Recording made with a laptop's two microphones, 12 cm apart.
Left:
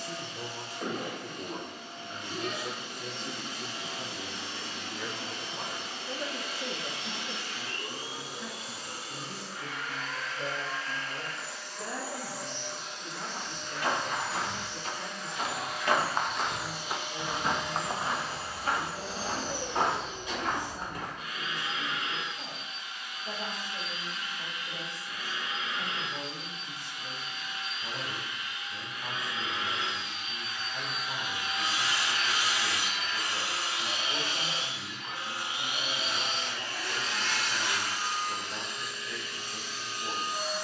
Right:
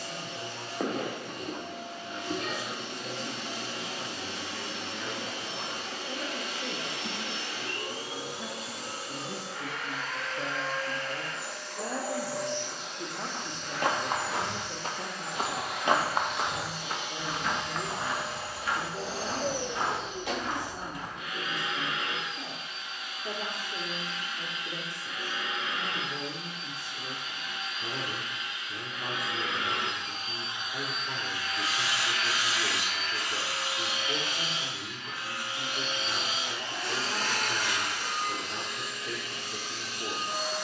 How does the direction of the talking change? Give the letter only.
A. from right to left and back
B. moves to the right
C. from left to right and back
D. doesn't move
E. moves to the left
B.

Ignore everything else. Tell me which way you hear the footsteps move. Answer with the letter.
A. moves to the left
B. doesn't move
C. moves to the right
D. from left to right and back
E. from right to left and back
A.